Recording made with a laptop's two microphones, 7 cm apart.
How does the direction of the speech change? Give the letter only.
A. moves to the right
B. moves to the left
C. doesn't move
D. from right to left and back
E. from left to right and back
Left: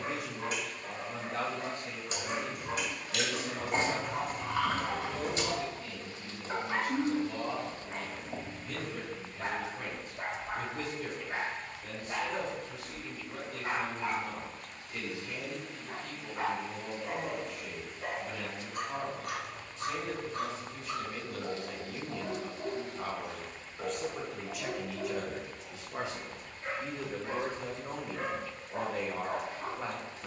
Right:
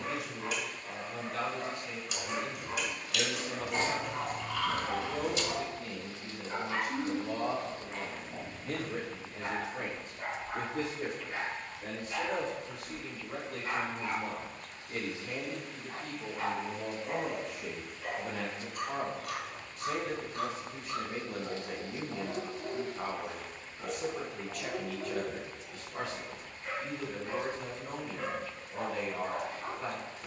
E.